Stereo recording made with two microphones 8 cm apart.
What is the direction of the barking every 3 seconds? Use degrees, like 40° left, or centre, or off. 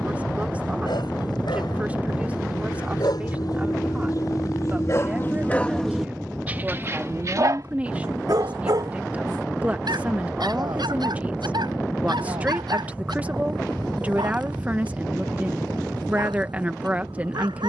80° left, 50° left, 50° right, 70° right, 80° right, 80° right.